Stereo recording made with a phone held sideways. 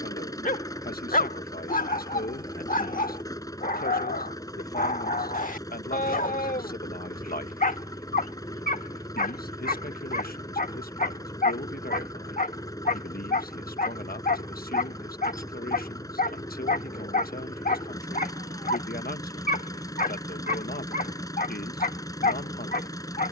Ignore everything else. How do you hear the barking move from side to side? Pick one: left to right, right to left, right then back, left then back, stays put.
stays put.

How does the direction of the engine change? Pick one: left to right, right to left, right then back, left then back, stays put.
stays put.